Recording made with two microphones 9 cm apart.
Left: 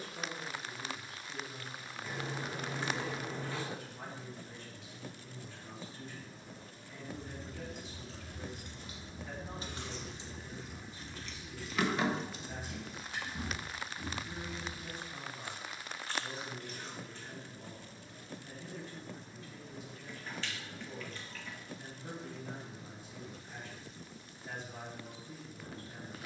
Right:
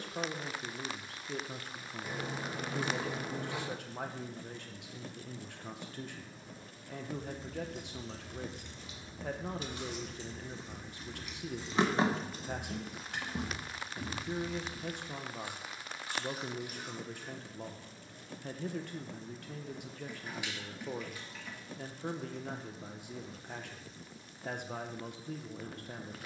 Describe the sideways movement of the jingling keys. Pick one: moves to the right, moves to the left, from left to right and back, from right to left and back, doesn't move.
moves to the right.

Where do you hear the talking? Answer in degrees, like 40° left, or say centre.
70° right.